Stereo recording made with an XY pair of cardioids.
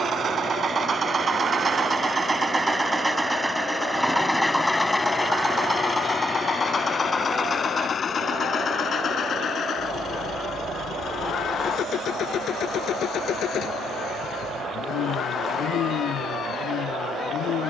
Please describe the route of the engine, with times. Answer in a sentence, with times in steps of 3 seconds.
In this clip you hear the engine on the right from 0 s, in the centre from 3 s and on the left from 6 s.